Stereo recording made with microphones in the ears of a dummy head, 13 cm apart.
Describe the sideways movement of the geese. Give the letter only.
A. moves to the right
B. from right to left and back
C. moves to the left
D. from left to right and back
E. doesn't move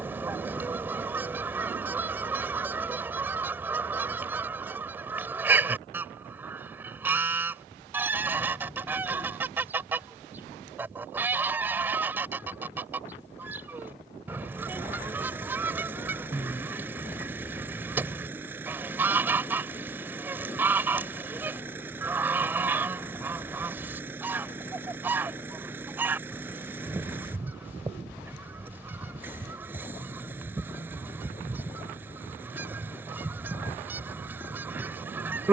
E.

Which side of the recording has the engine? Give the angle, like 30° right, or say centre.
10° right.